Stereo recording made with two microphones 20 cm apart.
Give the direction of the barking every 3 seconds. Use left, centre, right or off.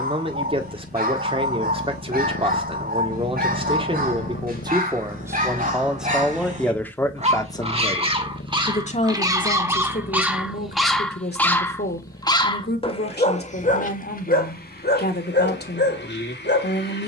right, right, right, centre, left, left.